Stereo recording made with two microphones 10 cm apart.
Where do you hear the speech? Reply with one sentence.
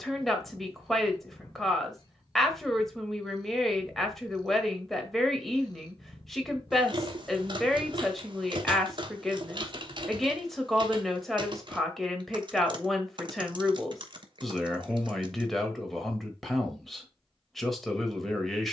In this clip you hear the speech in the centre.